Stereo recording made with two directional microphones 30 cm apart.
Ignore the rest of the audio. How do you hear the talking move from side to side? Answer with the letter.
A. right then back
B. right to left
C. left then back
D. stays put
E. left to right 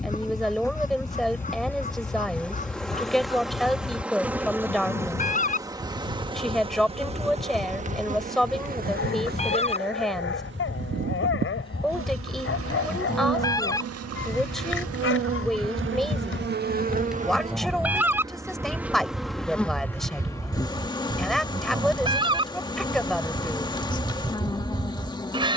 D.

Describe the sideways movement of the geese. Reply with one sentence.
You can hear the geese go from the left side to the right.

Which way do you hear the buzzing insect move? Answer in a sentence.
In this clip you hear the buzzing insect move from left to right and back again.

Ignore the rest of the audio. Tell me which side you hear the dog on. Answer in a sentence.
In this clip you hear the dog on the left.